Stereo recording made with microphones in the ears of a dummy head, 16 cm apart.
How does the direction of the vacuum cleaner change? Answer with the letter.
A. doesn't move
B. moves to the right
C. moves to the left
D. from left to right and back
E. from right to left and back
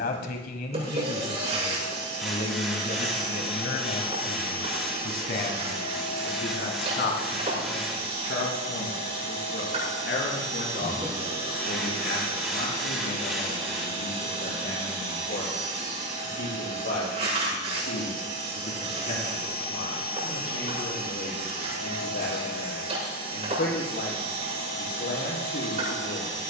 A.